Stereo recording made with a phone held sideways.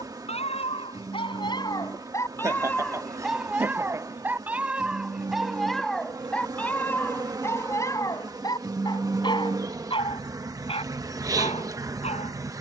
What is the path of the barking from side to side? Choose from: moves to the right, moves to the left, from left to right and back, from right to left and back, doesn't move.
from left to right and back.